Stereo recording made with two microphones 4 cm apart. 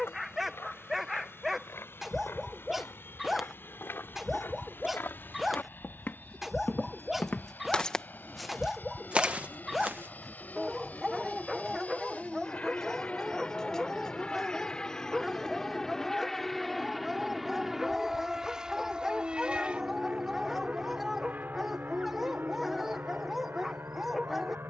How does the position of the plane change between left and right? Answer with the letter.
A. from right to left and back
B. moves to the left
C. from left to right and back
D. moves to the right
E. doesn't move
D.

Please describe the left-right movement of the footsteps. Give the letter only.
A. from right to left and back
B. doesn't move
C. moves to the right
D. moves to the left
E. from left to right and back
C.